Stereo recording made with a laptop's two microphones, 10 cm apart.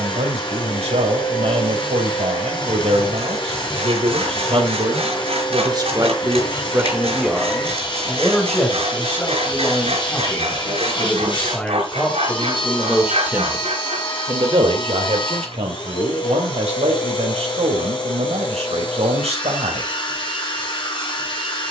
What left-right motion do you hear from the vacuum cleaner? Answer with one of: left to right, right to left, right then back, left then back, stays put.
stays put.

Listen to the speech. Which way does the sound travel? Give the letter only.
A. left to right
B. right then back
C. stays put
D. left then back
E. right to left
D.